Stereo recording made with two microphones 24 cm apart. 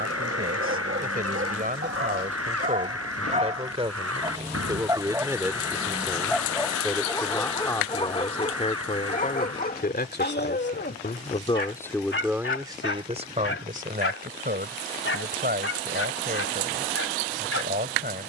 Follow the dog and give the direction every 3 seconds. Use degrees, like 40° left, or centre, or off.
50° right, 20° right, 20° left, 40° left, 60° left, 70° left.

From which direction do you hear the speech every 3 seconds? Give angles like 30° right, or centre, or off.
40° right, 20° right, 10° left, 30° left, 30° right, 40° right.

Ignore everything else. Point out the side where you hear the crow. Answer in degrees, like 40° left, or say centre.
80° right.